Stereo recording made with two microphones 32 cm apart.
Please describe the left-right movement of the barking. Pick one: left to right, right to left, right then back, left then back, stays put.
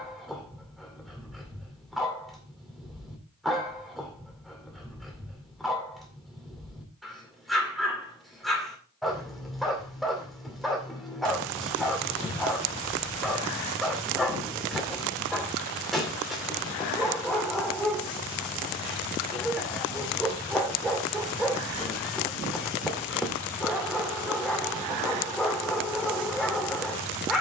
stays put.